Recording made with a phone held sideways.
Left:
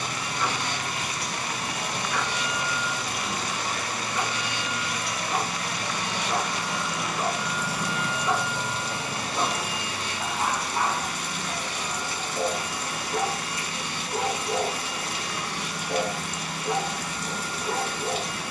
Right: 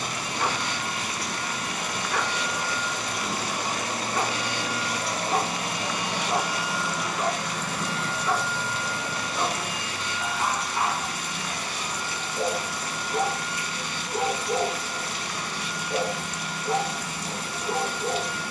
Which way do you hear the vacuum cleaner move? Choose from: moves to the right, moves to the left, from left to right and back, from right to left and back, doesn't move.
from left to right and back.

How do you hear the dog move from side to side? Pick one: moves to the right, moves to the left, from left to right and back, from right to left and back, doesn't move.
moves to the left.